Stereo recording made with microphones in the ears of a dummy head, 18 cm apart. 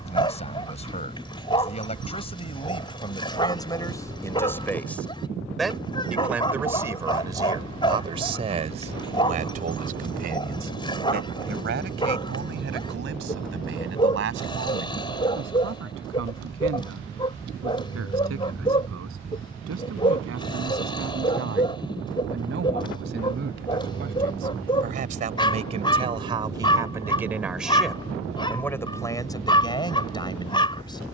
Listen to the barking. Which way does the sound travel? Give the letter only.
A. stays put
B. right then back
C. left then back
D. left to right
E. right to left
A.